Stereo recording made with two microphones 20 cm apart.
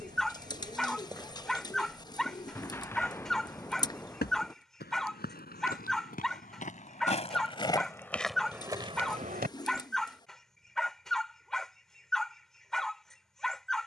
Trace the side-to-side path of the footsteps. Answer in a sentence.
You can hear the footsteps go left and come back.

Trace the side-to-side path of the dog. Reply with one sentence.
In this clip you hear the dog stay put.